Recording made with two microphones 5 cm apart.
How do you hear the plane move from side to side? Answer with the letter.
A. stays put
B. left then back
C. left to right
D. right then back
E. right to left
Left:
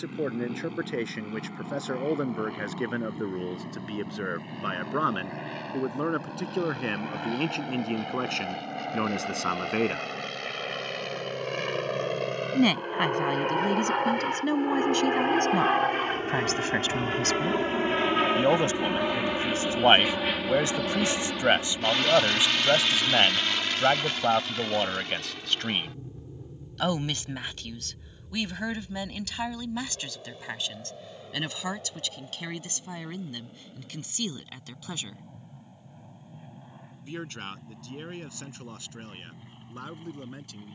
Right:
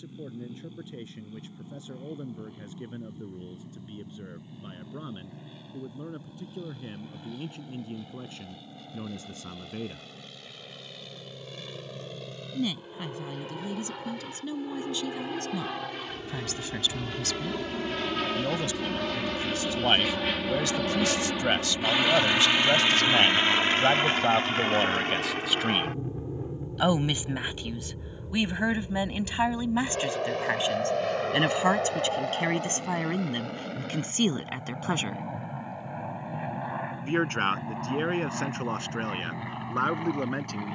C.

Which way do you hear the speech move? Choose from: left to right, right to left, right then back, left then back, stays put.
left to right.